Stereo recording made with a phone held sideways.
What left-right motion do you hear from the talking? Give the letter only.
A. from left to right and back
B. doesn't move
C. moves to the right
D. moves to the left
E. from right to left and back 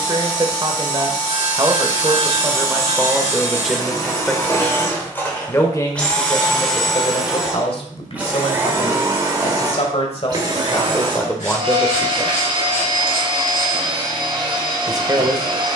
E.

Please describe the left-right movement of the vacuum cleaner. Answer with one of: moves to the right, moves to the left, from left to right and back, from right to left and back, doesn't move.
moves to the right.